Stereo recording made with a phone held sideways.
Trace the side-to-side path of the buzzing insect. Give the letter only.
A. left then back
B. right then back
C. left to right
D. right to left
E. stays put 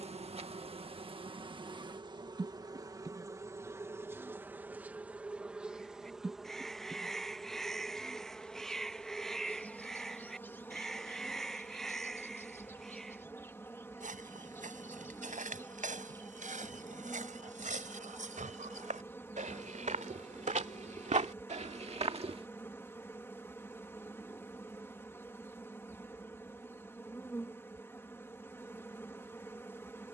D.